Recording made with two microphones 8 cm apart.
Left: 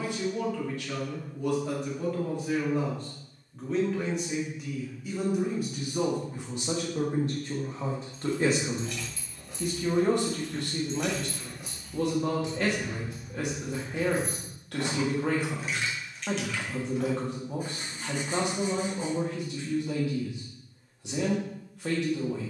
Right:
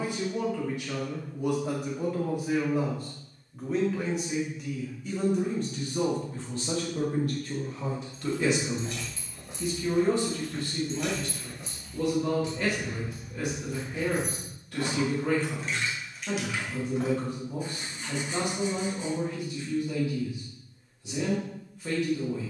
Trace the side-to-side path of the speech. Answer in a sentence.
In this clip you hear the speech move from right to left.